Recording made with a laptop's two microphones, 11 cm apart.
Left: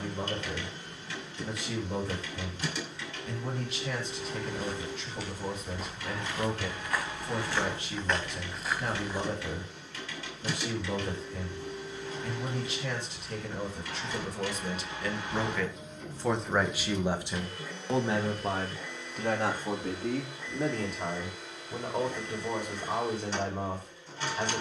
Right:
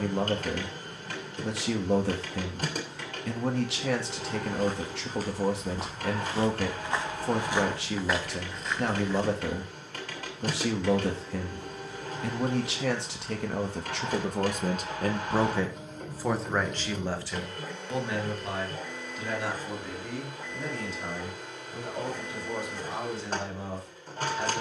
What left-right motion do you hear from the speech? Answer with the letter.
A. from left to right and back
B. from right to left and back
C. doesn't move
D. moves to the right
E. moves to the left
E.